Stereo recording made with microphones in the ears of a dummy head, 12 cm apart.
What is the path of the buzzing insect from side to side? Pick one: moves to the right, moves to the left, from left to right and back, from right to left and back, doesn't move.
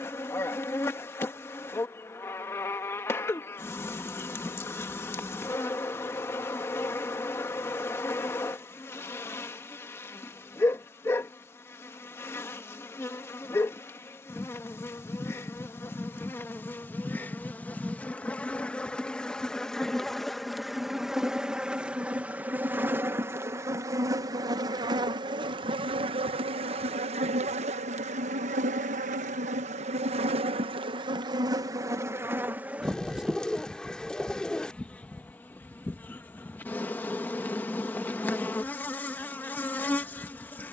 from left to right and back.